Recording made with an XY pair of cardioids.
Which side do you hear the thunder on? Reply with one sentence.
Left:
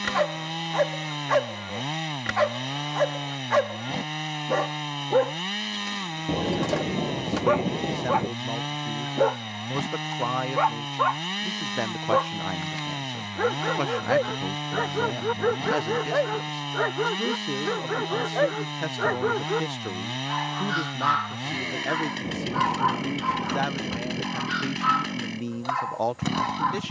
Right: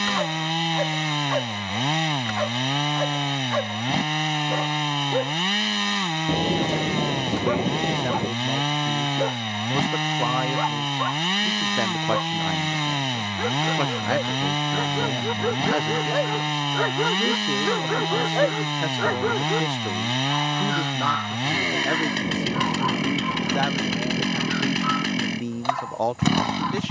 In this clip you hear the thunder in the centre.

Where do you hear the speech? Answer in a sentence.
In this clip you hear the speech in the centre.